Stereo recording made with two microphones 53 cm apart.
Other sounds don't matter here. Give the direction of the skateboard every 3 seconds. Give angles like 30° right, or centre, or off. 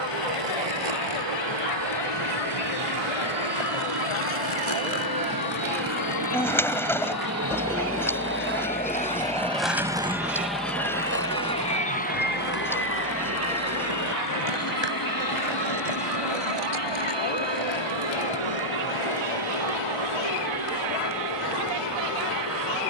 80° left, 60° left, 30° left, 20° right, 50° right, 60° right, 70° right, off.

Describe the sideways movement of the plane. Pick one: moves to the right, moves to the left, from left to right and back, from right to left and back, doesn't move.
moves to the left.